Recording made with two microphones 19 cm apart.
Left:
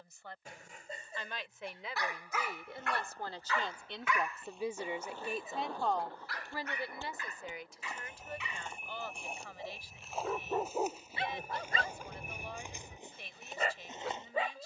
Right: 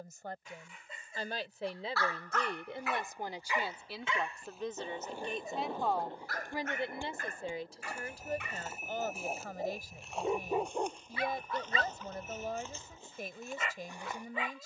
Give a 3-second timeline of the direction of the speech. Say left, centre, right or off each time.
right, centre, right, right, right.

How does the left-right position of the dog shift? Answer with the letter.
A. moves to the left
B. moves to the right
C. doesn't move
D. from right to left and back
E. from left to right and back
E.